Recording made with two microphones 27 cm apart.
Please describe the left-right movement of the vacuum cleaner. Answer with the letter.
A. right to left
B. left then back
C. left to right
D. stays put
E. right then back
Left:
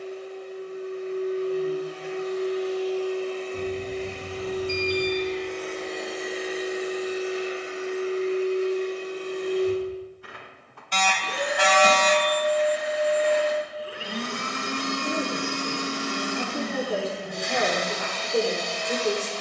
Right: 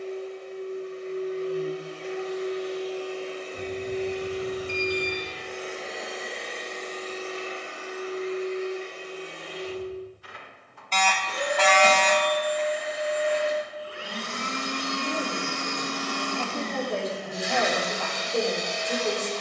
B.